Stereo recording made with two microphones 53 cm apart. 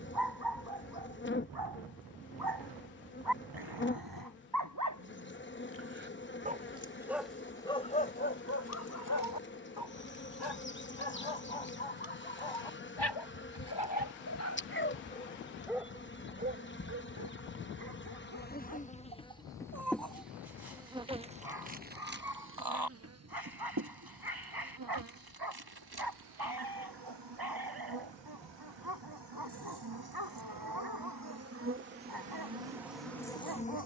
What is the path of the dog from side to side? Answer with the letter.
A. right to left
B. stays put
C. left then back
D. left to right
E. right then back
C.